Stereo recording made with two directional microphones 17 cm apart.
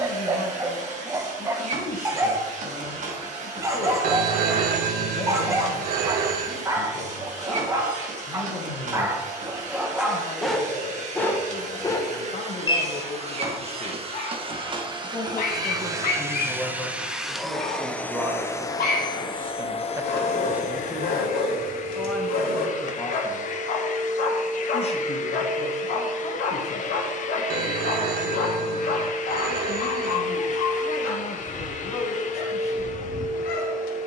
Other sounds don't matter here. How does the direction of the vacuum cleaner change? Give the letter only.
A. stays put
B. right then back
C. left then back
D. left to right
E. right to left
E.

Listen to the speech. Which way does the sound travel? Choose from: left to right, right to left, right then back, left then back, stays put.
right then back.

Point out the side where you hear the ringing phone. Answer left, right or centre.
right.